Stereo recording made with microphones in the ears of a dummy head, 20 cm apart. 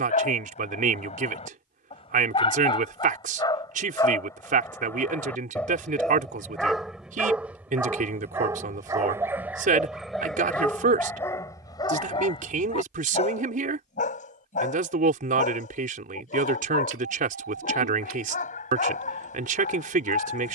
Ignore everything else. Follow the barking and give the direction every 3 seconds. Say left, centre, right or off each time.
left, centre, centre, centre, left, left, left.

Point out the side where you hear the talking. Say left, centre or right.
right.